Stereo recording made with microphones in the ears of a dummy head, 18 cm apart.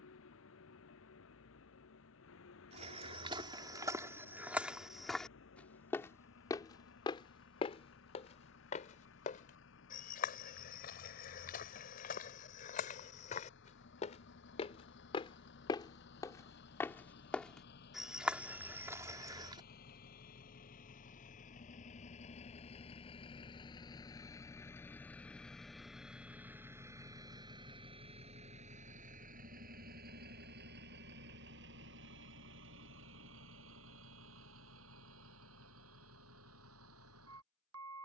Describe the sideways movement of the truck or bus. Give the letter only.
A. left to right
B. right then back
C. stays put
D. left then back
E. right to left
A.